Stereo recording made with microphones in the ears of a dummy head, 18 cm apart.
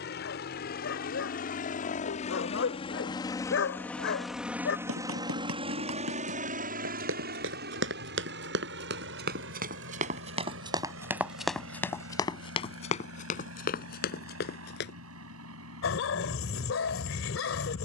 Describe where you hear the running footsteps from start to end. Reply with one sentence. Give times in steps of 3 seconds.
You can hear the running footsteps not at all from 0 s, on the right from 3 s, on the left from 12 s and not at all from 15 s.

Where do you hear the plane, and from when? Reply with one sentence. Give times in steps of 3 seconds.
You can hear the plane on the left from 0 s, in the centre from 3 s and on the right from 6 s.